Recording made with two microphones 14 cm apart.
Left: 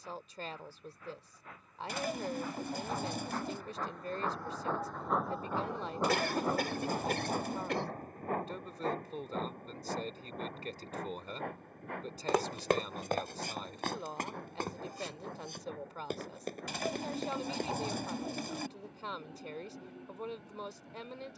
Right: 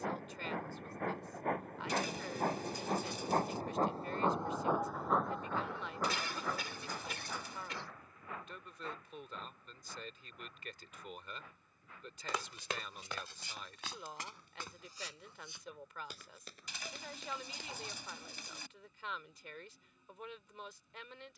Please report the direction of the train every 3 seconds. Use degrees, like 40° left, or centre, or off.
70° right, 20° right, 40° left, 60° left, 70° left, 70° left, 70° left.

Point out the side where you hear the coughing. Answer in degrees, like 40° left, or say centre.
60° left.